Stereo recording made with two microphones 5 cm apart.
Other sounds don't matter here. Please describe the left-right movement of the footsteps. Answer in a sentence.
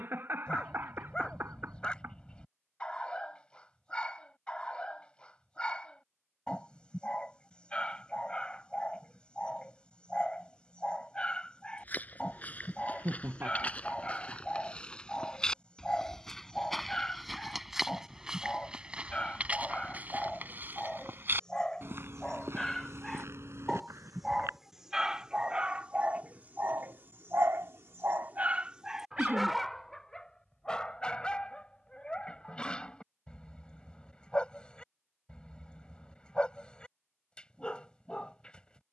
You can hear the footsteps move from left to right.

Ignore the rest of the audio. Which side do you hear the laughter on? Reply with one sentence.
You can hear the laughter on the right.